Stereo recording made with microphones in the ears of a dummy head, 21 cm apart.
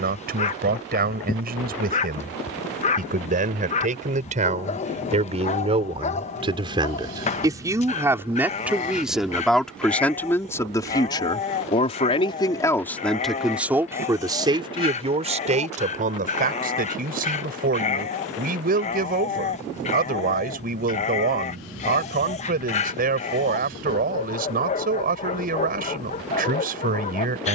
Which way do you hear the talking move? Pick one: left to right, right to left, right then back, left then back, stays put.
left then back.